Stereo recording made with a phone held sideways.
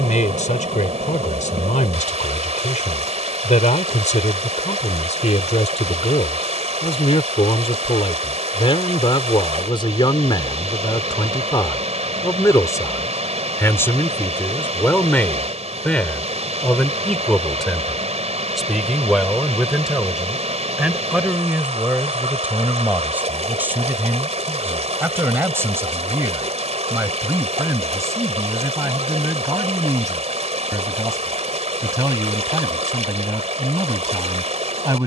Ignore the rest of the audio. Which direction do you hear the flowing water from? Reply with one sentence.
You can hear the flowing water on the right.